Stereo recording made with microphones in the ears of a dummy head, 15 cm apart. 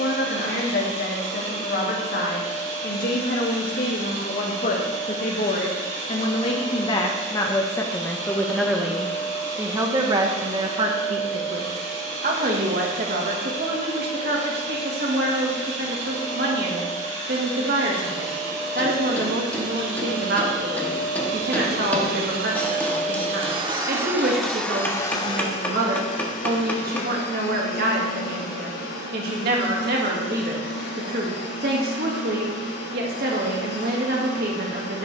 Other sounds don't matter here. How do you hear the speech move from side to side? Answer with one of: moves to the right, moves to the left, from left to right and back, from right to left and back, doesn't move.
moves to the right.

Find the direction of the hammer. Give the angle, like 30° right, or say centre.
10° left.